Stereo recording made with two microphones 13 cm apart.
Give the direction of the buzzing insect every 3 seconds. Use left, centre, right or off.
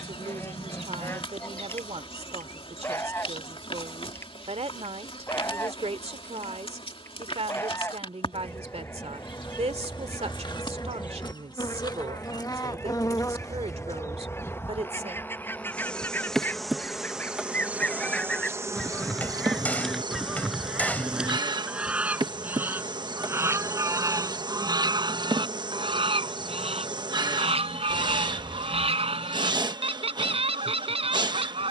left, left, left, left, left, centre, right, right, right, right, right.